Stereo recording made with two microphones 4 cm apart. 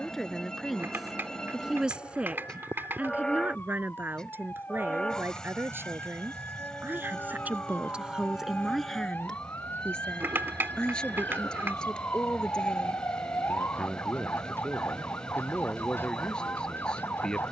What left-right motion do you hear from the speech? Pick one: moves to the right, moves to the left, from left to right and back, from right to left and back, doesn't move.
from left to right and back.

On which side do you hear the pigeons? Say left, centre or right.
right.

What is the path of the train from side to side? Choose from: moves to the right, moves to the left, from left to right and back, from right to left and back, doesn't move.
doesn't move.